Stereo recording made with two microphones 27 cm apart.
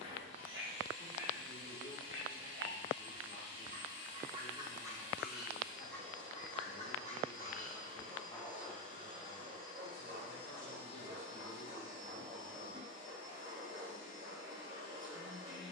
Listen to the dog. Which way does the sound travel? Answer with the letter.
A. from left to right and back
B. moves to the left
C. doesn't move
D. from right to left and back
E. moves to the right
D.